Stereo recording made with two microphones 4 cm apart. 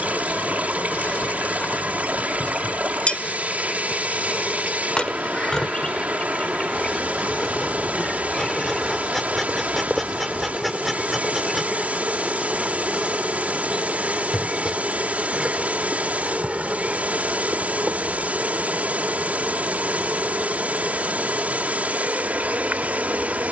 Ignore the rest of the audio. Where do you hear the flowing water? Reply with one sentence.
You can hear the flowing water on the right.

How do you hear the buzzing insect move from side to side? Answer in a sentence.
You can hear the buzzing insect move to the right.